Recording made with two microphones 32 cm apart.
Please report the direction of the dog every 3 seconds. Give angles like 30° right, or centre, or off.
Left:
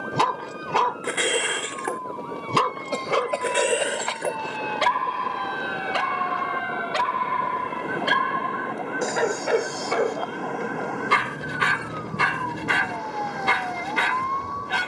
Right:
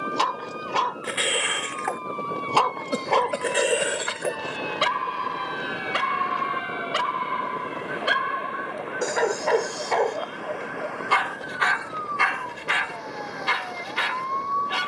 50° left, 10° right, 10° right, 20° left, 60° left.